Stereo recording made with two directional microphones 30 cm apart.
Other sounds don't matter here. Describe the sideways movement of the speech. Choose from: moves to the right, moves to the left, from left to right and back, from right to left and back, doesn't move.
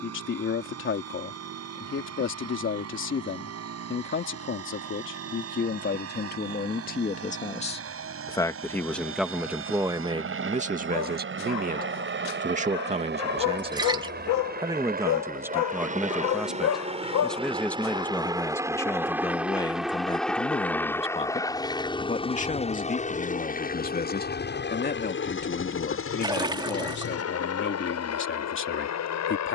from left to right and back.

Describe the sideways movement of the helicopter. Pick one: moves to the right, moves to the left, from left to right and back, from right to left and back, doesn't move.
moves to the left.